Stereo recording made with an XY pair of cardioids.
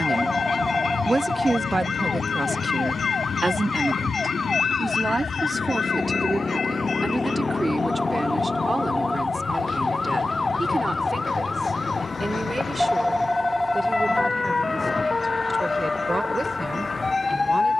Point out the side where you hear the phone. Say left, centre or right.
centre.